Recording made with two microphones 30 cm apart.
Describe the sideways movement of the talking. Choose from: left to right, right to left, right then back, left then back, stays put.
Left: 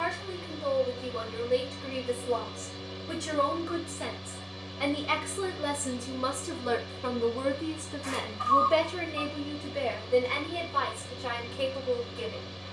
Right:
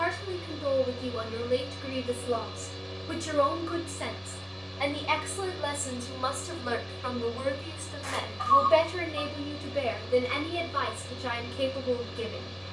left then back.